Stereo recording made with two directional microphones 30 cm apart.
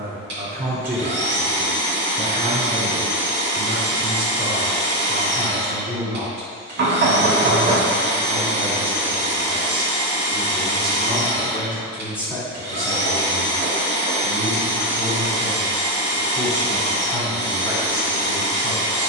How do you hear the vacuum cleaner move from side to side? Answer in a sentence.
You can hear the vacuum cleaner stay in one place.